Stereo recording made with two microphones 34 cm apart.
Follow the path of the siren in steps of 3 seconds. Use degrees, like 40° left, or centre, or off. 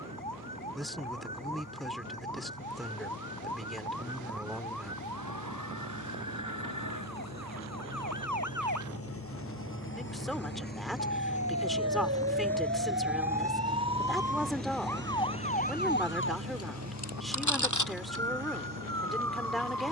70° right, 70° right, 60° right, 50° right, 20° right, 40° left, 70° left.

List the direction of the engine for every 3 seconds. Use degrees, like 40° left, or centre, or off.
60° left, 60° left, 50° left, 30° left, 10° right, 50° right, 70° right.